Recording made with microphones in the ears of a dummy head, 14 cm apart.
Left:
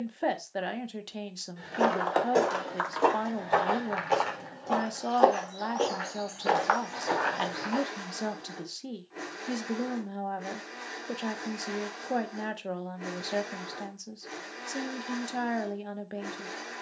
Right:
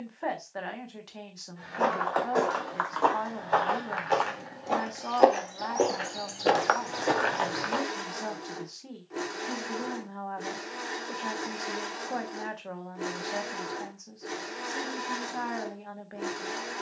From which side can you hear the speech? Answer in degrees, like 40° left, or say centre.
30° left.